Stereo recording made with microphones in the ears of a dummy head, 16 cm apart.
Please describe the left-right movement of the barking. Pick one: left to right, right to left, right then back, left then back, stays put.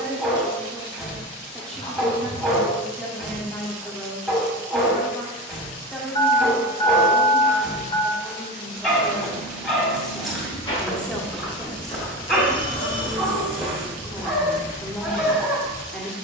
stays put.